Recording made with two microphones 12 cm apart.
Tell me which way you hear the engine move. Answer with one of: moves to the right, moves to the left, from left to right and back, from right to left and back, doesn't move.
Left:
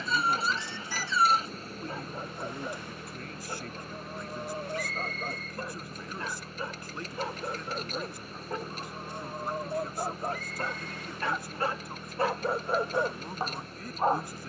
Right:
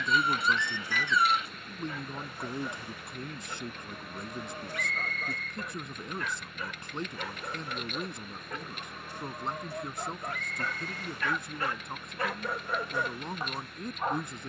doesn't move.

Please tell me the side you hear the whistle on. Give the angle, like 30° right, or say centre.
30° left.